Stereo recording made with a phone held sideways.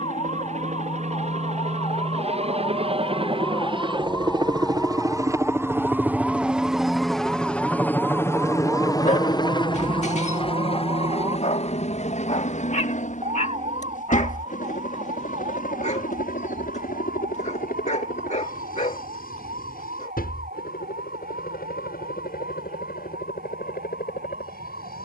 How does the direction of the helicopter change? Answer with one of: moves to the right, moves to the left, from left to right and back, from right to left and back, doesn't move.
moves to the left.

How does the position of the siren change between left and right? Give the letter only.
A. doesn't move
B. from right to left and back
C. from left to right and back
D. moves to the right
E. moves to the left
D.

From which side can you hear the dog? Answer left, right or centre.
left.